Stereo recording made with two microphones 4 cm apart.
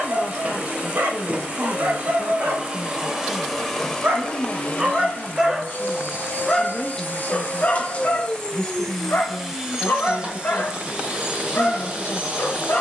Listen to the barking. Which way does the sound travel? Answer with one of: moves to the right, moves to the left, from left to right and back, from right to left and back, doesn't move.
moves to the left.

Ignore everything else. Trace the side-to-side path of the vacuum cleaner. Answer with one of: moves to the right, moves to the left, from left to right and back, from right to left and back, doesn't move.
from right to left and back.